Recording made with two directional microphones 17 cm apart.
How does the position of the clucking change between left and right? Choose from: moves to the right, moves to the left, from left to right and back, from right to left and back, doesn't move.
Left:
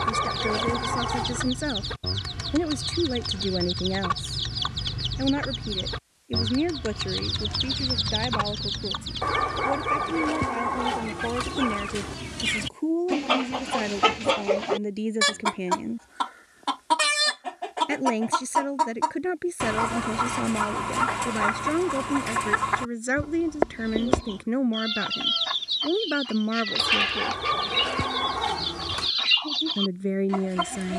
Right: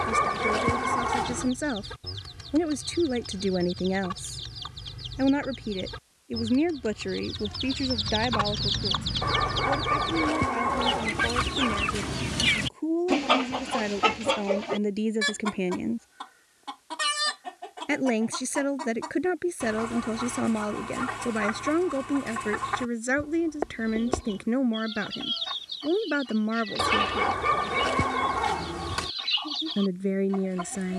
from left to right and back.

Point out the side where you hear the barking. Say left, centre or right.
centre.